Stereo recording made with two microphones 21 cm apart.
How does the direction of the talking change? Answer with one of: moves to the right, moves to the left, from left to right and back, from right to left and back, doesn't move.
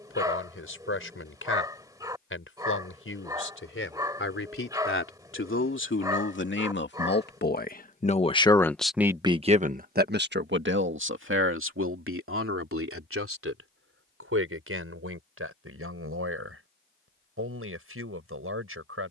moves to the right.